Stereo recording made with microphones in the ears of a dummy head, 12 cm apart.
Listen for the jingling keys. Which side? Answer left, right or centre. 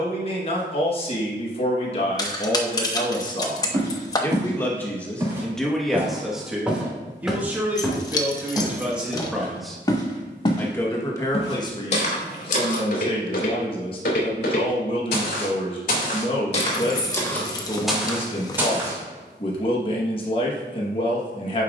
left.